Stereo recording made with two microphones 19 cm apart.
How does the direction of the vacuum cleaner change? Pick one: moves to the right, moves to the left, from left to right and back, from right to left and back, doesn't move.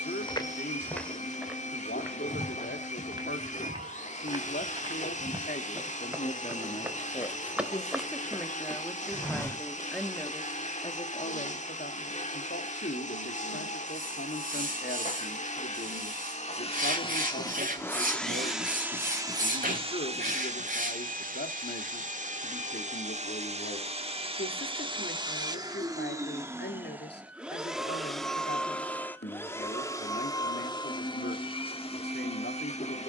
from left to right and back.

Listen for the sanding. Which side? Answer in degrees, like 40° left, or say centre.
50° right.